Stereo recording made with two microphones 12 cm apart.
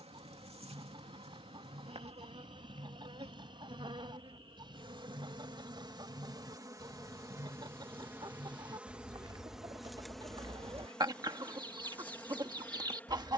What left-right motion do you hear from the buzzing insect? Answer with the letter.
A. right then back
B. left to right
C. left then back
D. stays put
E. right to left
E.